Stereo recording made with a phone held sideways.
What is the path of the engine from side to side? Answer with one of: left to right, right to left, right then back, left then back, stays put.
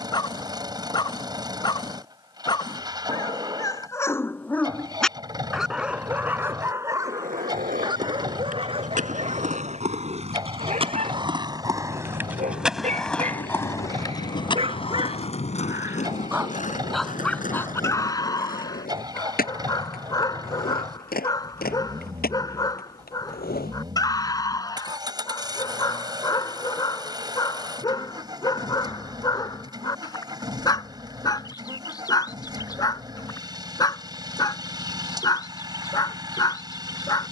stays put.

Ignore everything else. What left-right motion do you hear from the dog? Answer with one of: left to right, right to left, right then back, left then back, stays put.
right then back.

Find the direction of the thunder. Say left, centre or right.
left.